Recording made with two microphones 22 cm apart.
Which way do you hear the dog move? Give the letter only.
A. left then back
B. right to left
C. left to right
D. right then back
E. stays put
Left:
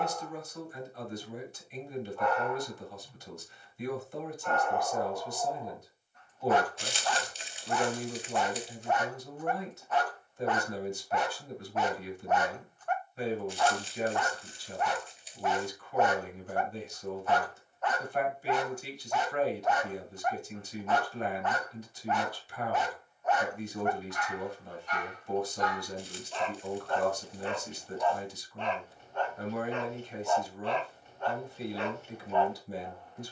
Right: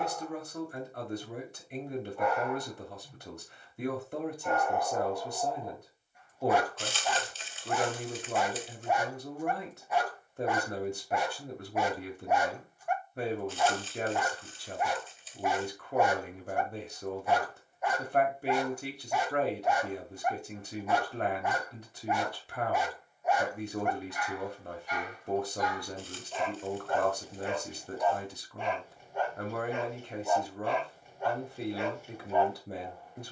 E.